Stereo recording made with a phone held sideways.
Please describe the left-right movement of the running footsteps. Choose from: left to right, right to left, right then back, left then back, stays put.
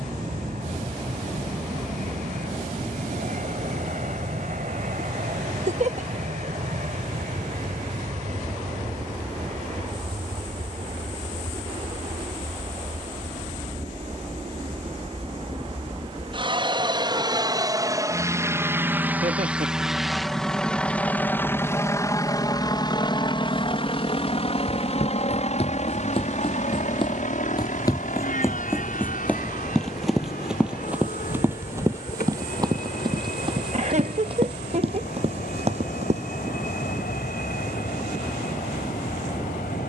left to right.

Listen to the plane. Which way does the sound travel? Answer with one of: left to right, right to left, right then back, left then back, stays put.
right to left.